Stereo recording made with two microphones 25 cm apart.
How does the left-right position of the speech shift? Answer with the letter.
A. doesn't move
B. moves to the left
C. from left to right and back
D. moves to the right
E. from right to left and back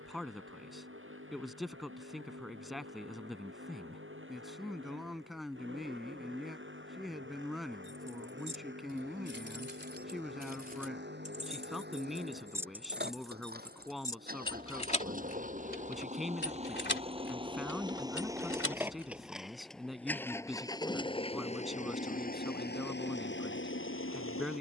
A.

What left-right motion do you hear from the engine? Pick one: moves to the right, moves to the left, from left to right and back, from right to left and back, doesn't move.
moves to the left.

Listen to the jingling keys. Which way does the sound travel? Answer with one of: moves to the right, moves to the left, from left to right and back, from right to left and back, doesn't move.
moves to the left.